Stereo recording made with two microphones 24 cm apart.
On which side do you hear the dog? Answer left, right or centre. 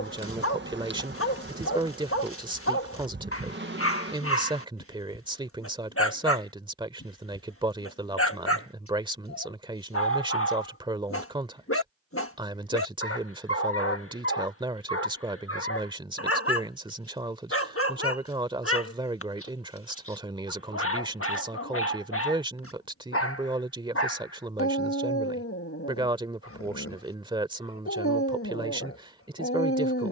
left.